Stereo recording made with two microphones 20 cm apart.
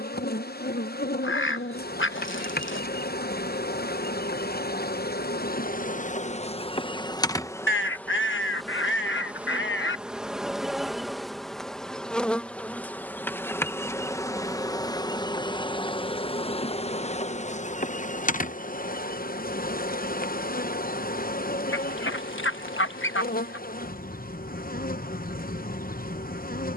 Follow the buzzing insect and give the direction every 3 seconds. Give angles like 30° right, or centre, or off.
50° left, 50° left, 20° left, centre, 10° left, 30° left, 50° left, 50° left, 50° left.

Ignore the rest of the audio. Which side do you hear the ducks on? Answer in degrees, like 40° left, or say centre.
80° left.